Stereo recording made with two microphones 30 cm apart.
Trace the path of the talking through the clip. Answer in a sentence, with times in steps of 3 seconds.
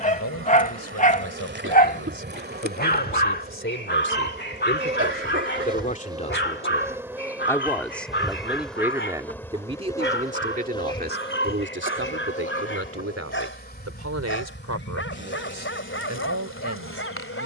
You can hear the talking on the left from 0 s, in the centre from 6 s and on the right from 9 s.